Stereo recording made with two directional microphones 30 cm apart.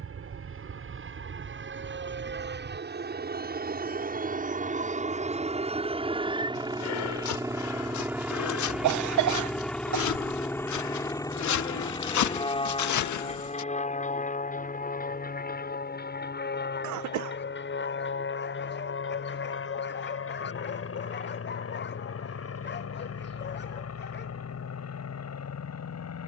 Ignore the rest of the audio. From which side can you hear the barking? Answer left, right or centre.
left.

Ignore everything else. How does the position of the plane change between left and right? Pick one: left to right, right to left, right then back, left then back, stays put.
right to left.